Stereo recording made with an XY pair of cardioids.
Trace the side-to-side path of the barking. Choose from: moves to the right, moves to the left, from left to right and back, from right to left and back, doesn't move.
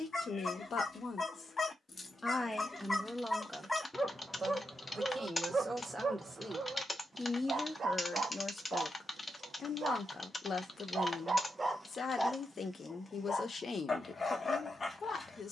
from left to right and back.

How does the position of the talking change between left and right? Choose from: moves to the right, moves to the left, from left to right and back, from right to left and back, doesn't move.
from left to right and back.